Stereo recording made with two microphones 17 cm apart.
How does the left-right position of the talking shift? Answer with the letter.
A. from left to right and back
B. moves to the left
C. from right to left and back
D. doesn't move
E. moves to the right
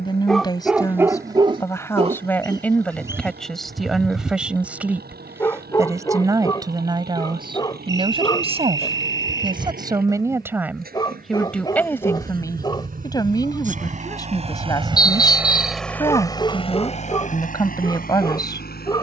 A.